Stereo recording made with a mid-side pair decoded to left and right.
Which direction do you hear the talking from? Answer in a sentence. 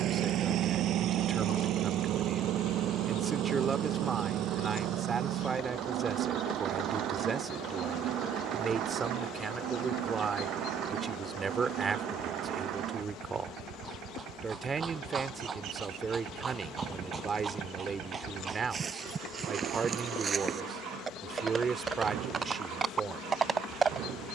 In this clip you hear the talking on the right.